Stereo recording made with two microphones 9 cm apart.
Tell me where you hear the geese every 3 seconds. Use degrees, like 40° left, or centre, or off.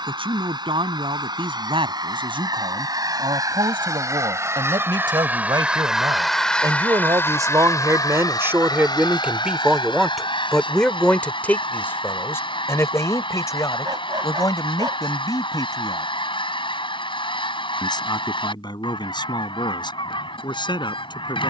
50° right, 30° right, 30° left, 70° left, 80° left, 80° left, 80° left.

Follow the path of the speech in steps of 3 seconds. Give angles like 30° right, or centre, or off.
80° right, 70° right, 40° right, centre, 40° left, 50° left, 60° left.